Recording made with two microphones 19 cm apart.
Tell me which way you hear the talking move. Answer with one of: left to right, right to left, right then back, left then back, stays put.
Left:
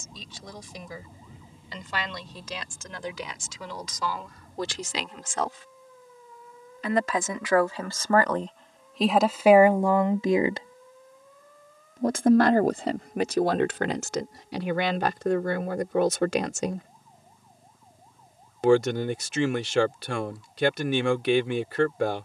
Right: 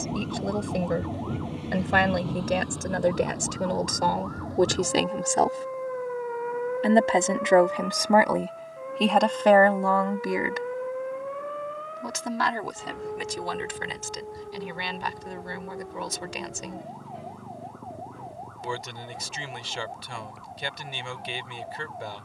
right to left.